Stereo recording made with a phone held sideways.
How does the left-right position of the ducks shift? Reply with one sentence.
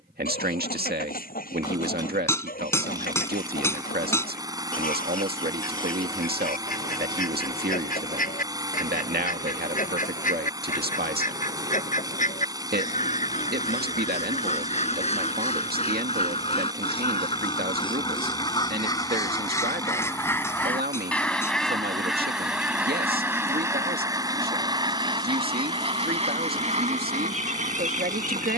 You can hear the ducks travel towards the right.